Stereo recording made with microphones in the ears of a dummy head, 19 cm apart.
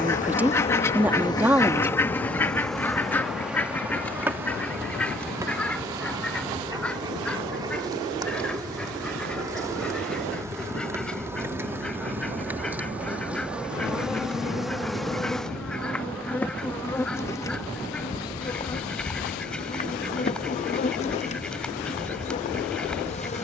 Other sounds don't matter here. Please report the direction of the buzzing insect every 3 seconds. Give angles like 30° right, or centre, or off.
20° left, 10° right, 20° right, 10° right, 10° right, 10° left, 30° left, 30° left.